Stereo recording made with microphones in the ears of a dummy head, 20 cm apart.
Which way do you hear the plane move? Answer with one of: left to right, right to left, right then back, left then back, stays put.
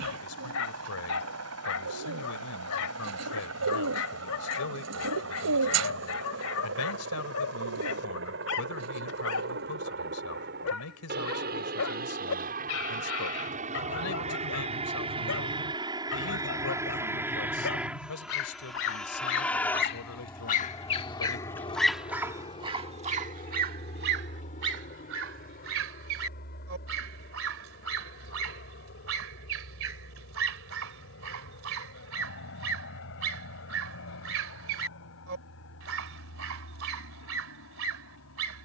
right to left.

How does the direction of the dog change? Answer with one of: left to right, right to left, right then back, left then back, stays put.
left to right.